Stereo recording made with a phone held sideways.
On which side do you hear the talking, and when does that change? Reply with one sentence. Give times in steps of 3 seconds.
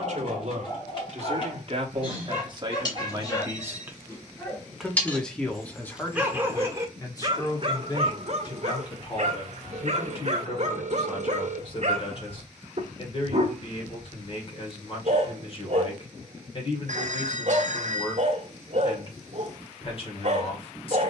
You can hear the talking on the right from 0 s, in the centre from 3 s and on the left from 6 s.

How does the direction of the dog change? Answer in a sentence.
In this clip you hear the dog move from left to right.